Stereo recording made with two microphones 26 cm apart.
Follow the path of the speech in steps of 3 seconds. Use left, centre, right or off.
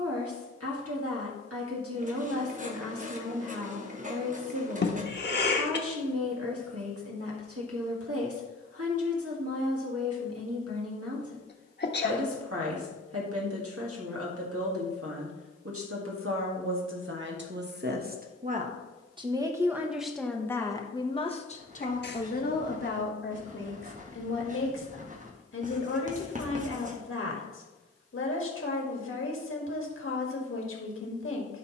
right, right, right, right, right, right, centre, left, left, left, left.